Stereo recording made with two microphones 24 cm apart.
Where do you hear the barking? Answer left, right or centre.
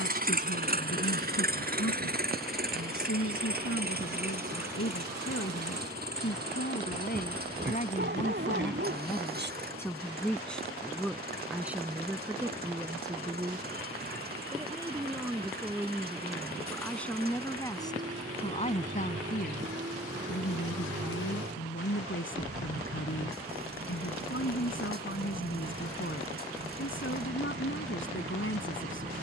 right.